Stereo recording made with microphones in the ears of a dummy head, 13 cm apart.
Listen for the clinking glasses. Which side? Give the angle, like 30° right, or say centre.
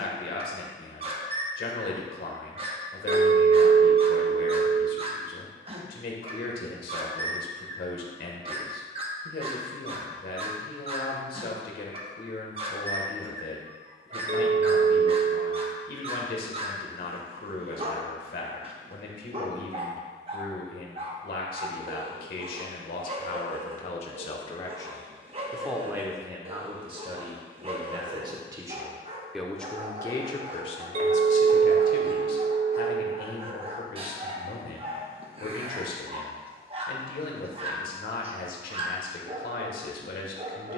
50° right.